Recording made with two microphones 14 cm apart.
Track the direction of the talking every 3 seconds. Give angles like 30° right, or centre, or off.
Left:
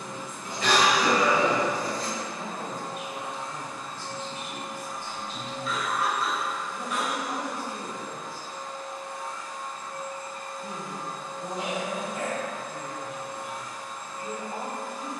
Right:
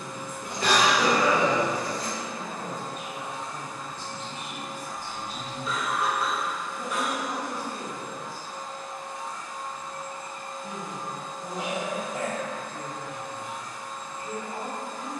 30° left, 10° right, 10° left, 40° left, 40° left.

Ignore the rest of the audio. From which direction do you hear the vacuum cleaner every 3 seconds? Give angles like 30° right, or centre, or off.
20° left, 10° left, 40° right, 20° right, 10° left.